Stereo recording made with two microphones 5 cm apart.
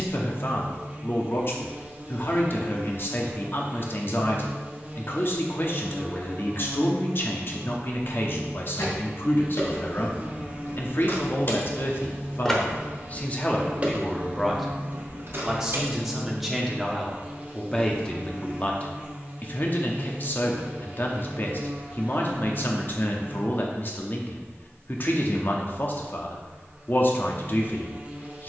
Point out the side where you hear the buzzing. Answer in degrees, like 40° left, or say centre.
30° right.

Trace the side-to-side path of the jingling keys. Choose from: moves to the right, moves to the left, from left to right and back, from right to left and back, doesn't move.
moves to the right.